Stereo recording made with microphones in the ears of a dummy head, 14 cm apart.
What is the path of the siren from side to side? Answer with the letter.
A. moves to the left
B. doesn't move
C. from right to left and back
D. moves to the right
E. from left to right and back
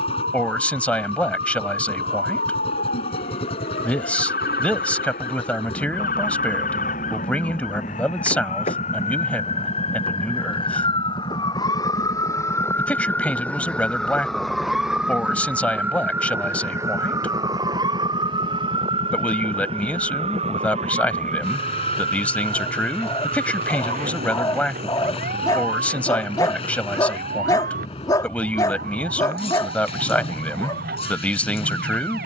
D.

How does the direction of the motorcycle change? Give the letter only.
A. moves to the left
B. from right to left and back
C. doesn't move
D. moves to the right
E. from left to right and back
C.